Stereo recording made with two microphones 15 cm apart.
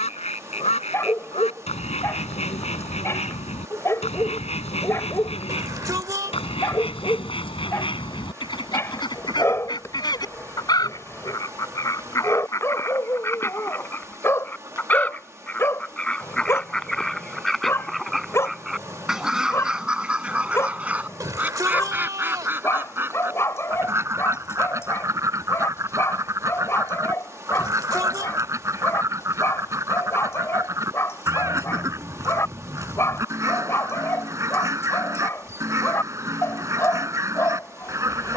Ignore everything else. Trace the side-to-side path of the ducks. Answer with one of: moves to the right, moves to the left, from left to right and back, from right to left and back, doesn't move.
moves to the right.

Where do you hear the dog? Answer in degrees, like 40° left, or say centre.
20° left.